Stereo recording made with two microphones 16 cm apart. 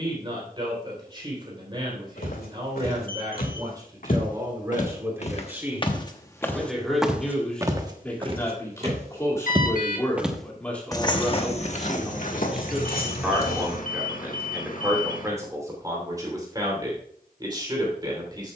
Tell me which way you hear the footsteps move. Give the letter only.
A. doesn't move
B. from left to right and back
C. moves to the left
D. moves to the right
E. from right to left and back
B.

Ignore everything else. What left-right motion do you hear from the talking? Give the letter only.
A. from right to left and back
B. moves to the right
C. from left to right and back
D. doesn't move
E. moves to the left
A.